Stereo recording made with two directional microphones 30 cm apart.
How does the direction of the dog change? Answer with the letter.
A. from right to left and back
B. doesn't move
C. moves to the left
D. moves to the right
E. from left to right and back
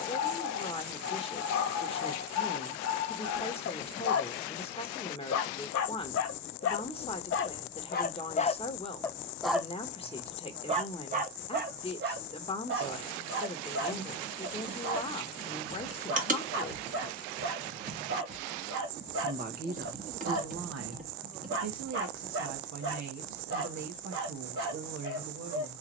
D.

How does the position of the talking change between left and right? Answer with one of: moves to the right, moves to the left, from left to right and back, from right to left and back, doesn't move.
moves to the right.